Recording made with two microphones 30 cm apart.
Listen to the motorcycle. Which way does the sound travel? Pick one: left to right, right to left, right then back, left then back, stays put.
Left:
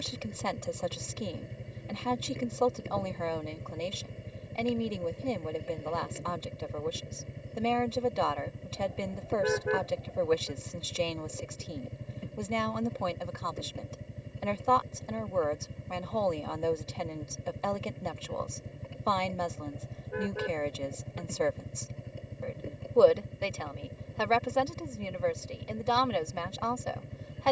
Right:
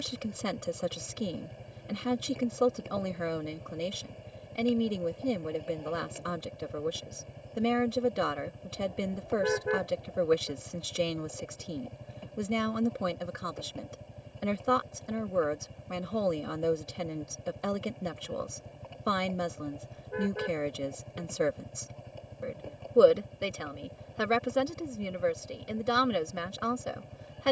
stays put.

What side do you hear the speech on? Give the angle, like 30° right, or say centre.
20° right.